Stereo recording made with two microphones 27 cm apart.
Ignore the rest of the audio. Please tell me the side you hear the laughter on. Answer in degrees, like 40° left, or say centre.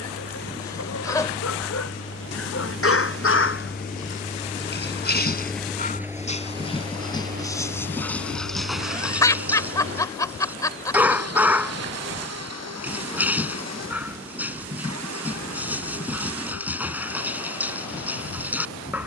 10° left.